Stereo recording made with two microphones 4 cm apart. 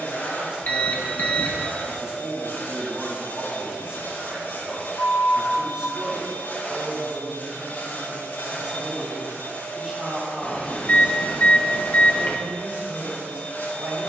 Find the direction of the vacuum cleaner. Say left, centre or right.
left.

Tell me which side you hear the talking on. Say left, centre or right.
right.